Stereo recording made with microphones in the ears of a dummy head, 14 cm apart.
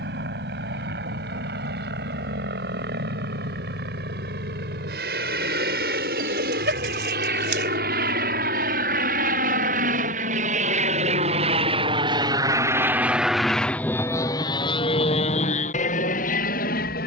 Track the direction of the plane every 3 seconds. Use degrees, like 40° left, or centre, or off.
80° right, 80° right, 70° right, 50° right, centre, 50° left.